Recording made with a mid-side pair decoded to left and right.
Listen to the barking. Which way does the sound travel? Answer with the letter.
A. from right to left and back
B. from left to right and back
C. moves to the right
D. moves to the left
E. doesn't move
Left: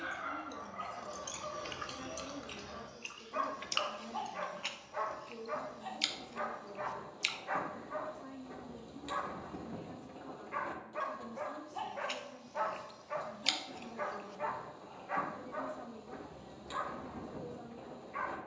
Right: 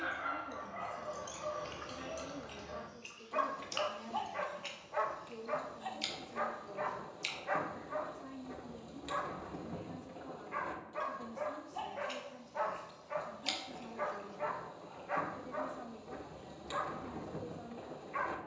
A.